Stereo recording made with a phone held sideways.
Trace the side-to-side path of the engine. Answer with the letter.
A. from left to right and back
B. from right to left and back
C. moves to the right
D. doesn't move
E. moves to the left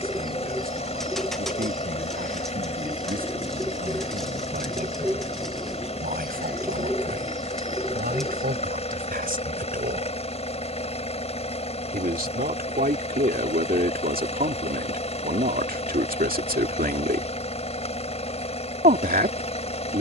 D.